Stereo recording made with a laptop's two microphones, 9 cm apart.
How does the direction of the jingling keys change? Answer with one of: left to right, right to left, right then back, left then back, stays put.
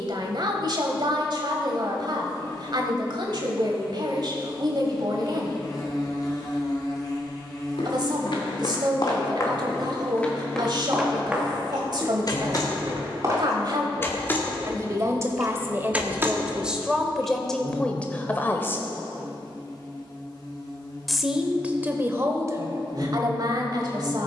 left to right.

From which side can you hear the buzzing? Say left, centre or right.
left.